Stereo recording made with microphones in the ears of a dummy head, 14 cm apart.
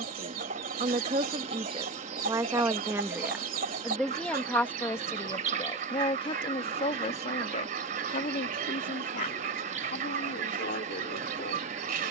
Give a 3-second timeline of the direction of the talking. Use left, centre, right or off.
right, centre, left, left.